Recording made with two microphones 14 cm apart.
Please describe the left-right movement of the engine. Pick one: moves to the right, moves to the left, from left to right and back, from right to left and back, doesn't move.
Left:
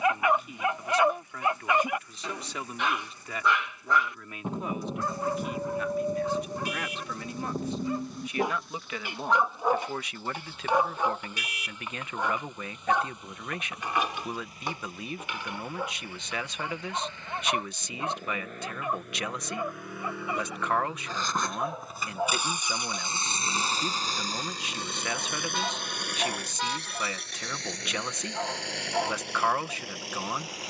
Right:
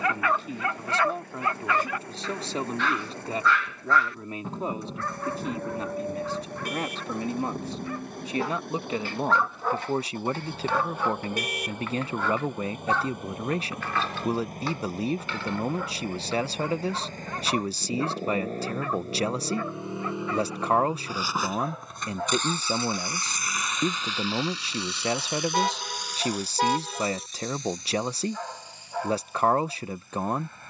moves to the left.